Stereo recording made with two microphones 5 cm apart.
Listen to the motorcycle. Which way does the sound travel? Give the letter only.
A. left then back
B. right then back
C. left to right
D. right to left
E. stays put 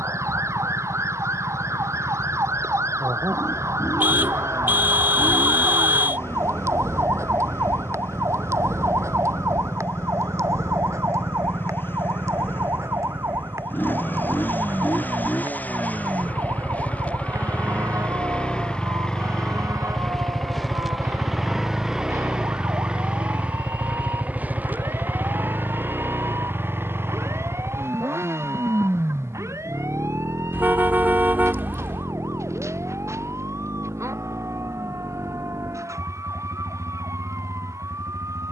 C.